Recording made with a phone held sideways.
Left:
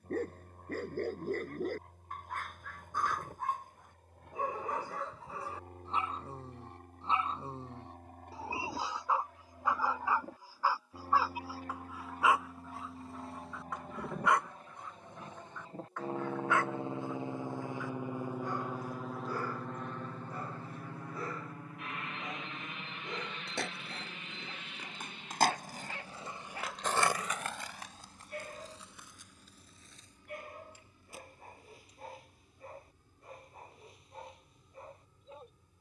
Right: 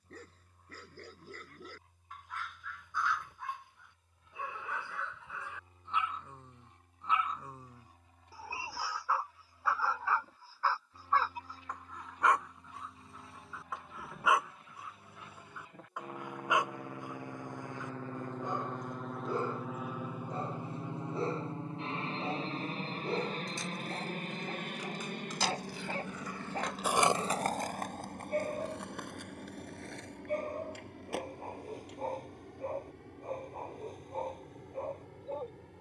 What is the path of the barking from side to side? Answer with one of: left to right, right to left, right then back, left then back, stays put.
left to right.